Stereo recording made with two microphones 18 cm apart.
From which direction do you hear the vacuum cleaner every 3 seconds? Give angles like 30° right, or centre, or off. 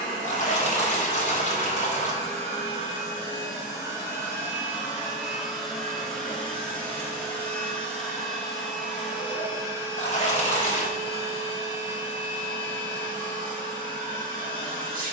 50° right, 10° right, 10° left, 30° right, 50° right.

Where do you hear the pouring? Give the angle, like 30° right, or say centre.
40° left.